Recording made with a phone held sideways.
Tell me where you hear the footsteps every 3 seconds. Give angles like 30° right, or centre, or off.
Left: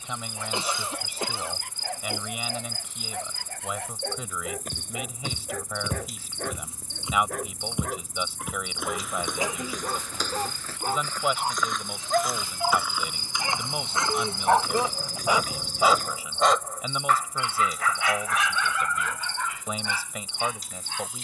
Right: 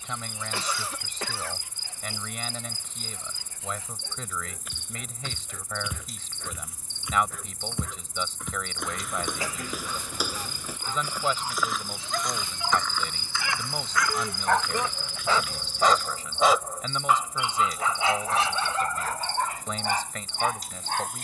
off, 50° left, 20° left, 10° right, 20° left, 50° left, off.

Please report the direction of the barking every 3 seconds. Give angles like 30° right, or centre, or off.
70° left, 70° left, 60° left, 50° left, 30° left, centre, 40° right.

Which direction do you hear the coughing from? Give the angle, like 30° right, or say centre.
20° left.